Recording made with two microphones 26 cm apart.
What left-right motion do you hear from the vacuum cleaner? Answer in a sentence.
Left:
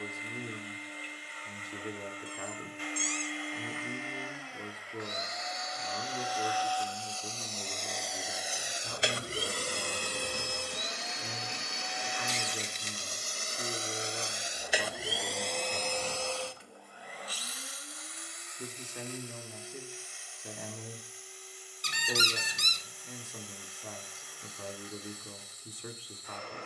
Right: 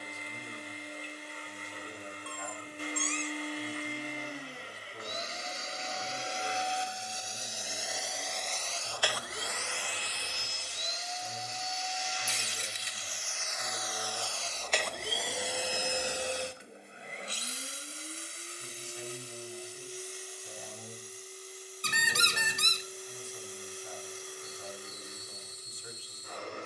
You can hear the vacuum cleaner move from right to left and back again.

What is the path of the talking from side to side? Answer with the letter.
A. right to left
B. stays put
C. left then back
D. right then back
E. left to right
B.